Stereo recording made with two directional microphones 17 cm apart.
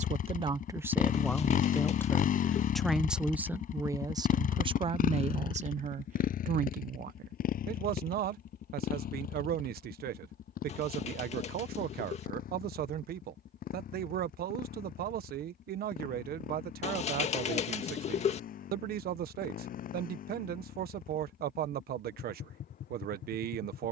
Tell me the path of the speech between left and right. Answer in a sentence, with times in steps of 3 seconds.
You can hear the speech in the centre from 0 s and on the right from 3 s.